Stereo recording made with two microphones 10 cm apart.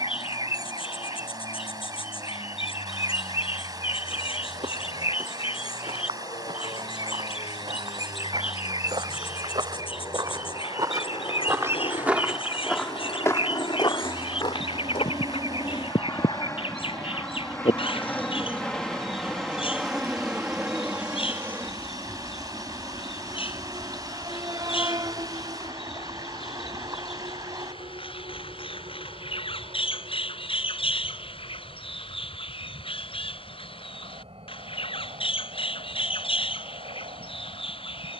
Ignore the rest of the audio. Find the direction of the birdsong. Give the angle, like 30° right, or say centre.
60° left.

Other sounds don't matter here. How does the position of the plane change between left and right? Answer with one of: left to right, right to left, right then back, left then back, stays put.
left to right.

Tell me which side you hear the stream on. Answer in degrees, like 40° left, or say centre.
40° right.